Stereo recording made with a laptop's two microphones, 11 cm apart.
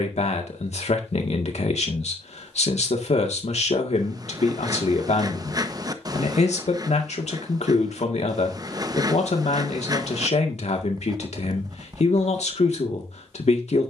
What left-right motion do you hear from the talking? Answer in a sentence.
In this clip you hear the talking stay in one place.